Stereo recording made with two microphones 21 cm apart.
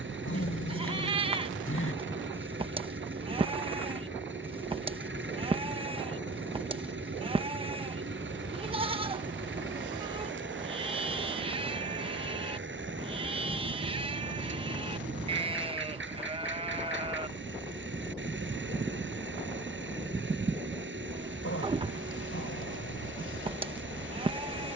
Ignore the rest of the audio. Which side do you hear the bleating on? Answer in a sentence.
You can hear the bleating on the right.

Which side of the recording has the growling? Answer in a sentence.
You can hear the growling on the left.